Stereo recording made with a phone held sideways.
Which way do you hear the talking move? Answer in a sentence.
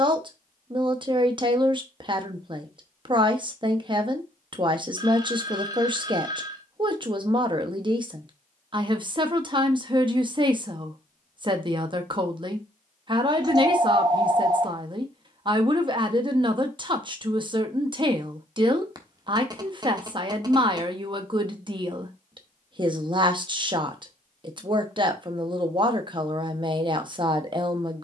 You can hear the talking stay put.